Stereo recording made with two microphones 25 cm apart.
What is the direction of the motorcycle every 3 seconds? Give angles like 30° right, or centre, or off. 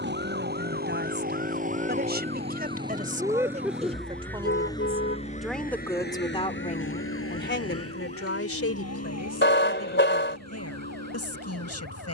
30° right, 10° left, 60° left, 80° left.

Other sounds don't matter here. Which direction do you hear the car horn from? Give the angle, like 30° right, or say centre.
50° left.